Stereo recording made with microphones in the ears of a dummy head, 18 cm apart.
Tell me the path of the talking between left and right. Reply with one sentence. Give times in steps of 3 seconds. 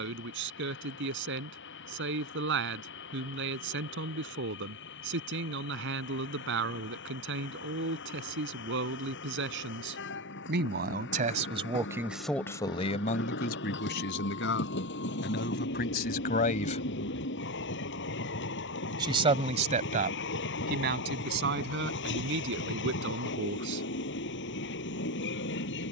You can hear the talking on the right from 0 s, on the left from 12 s, on the right from 18 s and not at all from 24 s.